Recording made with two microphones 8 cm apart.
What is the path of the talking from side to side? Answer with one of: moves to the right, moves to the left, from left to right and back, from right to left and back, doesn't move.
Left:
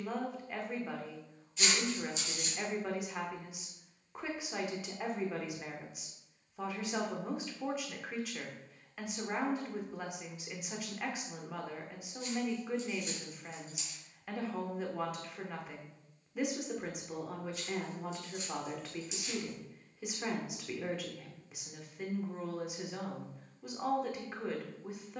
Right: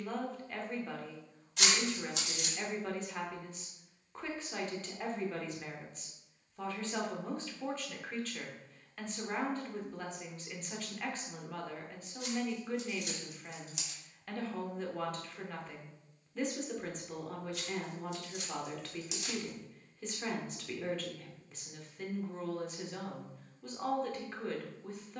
doesn't move.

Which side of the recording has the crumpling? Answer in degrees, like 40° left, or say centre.
60° right.